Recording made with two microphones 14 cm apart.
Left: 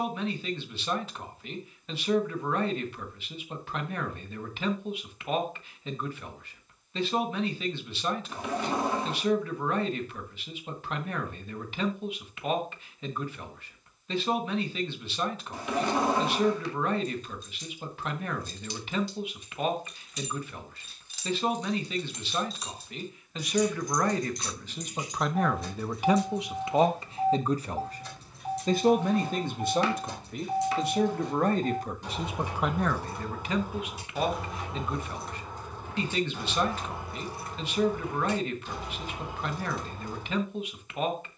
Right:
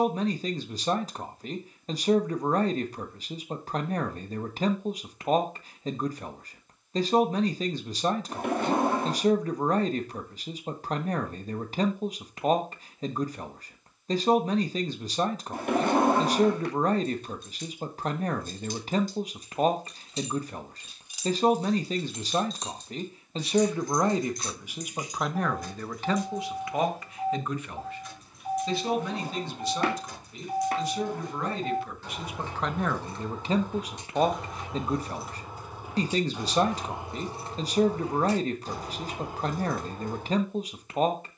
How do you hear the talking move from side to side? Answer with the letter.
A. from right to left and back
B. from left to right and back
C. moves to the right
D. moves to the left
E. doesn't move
A.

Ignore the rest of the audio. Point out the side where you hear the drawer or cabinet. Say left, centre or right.
right.